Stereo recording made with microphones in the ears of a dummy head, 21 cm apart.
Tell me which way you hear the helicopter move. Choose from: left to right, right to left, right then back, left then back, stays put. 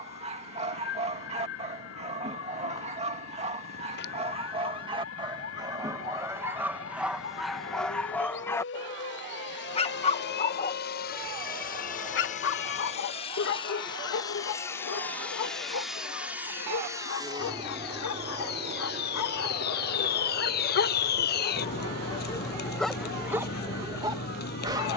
left to right.